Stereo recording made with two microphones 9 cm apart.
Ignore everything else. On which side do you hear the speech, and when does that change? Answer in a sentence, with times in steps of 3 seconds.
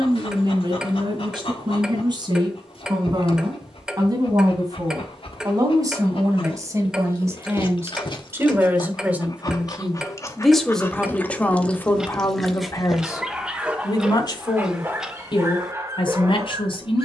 You can hear the speech on the right from 0 s, in the centre from 9 s and on the left from 12 s.